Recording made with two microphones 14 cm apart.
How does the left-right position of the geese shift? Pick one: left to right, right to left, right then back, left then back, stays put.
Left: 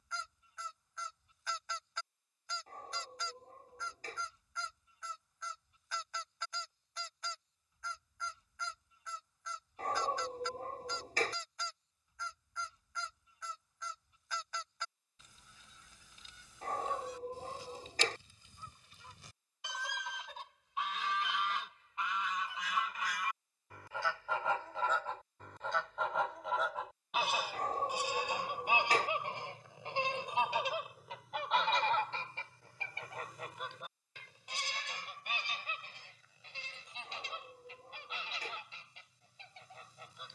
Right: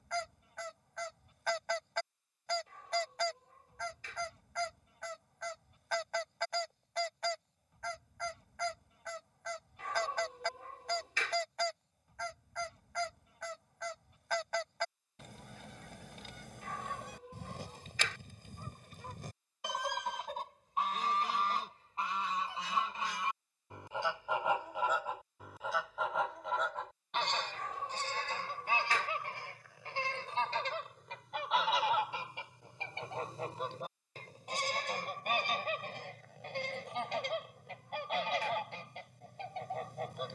left then back.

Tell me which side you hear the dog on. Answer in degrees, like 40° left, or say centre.
40° left.